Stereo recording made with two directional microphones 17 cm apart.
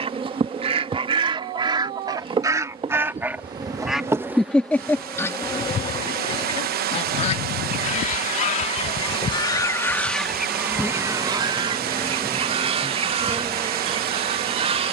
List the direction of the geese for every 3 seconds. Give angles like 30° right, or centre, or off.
30° right, centre, 40° left, centre, 40° right.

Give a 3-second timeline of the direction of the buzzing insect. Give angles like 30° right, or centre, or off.
30° right, centre, 50° left, 10° left, 20° right.